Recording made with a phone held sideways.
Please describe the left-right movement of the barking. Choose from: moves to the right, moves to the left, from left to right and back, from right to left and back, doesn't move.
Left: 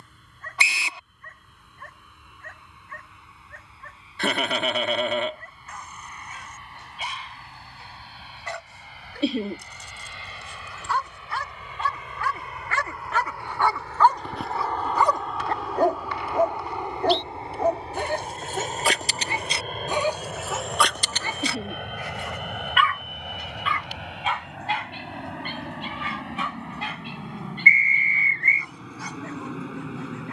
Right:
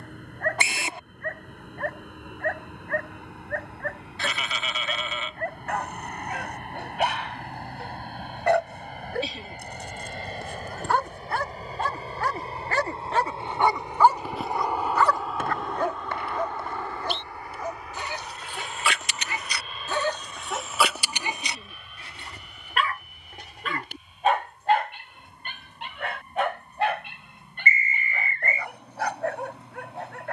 from right to left and back.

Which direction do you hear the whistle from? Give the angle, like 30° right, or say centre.
50° right.